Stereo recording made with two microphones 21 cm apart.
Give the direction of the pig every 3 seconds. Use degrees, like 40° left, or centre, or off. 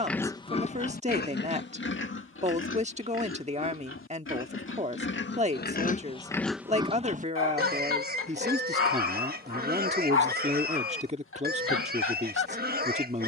50° left, 70° left, 30° right, 50° right, 50° right.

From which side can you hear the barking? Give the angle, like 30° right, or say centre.
80° left.